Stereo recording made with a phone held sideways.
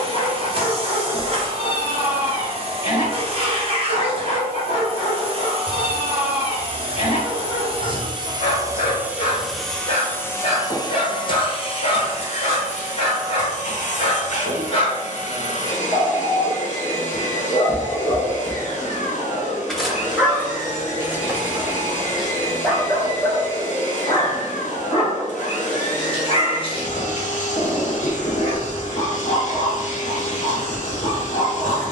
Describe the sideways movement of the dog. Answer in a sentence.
You can hear the dog move from left to right and back again.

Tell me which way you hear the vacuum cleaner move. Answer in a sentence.
In this clip you hear the vacuum cleaner move to the left.